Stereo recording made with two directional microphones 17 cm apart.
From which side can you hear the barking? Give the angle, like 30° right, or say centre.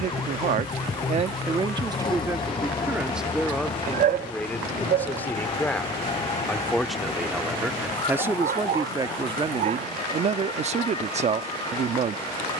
60° right.